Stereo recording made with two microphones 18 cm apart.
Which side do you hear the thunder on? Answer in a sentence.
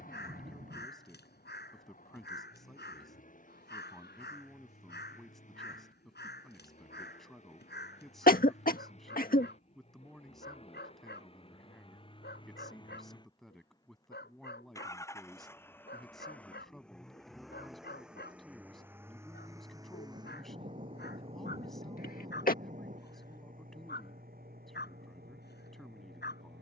You can hear the thunder on the right.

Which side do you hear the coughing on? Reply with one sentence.
In this clip you hear the coughing on the left.